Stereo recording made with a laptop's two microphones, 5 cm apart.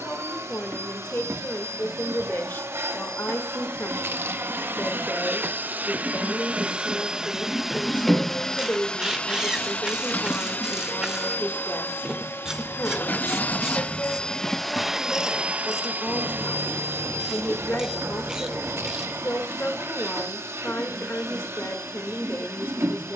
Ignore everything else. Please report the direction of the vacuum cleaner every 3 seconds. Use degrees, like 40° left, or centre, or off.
70° right, 50° right, 10° right, 40° left, 30° left, 50° right, 70° right, 70° right.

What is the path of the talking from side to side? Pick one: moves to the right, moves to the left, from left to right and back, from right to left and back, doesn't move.
doesn't move.